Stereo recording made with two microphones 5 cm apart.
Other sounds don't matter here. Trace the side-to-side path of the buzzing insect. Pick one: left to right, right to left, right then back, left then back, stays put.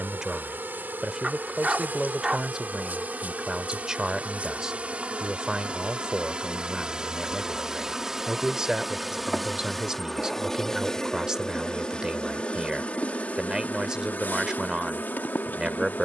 right to left.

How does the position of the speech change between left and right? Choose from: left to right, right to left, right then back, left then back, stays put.
stays put.